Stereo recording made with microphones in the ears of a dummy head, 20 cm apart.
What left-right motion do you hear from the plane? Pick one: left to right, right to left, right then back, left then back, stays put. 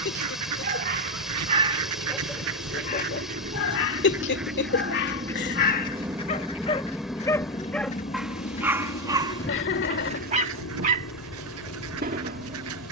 right to left.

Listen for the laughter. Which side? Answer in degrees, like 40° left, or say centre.
50° left.